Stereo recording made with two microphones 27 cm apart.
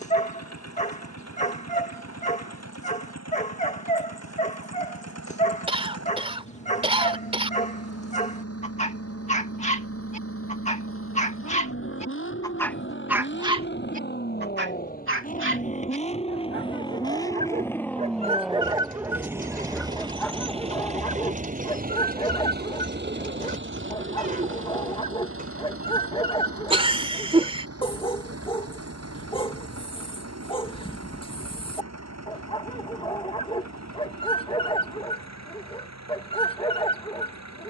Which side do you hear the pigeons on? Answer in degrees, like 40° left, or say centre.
30° right.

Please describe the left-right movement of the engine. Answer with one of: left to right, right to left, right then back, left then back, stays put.
left to right.